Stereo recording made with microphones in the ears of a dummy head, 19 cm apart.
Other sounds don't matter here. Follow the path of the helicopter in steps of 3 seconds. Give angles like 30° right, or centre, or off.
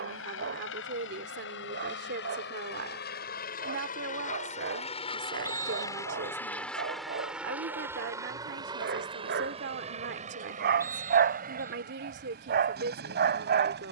60° left, 30° left, 10° right, 30° right, 50° right.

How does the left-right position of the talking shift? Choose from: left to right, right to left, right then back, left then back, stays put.
stays put.